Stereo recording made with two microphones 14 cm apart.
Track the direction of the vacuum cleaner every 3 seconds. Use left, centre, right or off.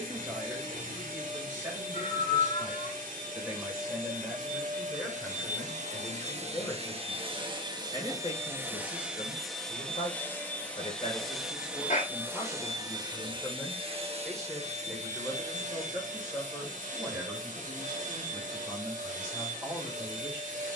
right, right, right, centre, right, right, right.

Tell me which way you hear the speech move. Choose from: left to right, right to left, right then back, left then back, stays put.
left then back.